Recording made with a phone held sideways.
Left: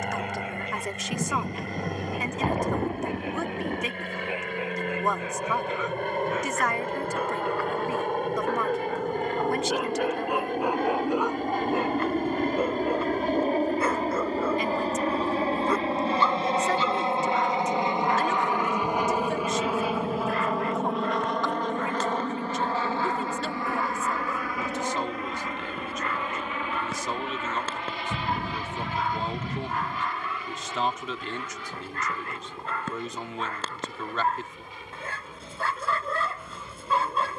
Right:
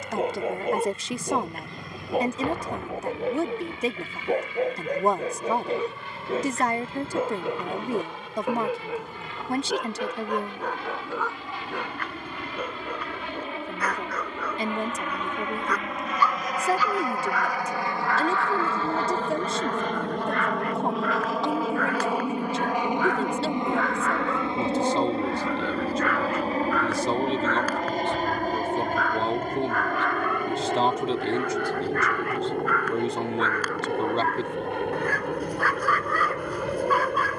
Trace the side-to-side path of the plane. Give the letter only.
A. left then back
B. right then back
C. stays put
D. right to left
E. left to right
E.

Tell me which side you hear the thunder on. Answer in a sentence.
In this clip you hear the thunder on the left.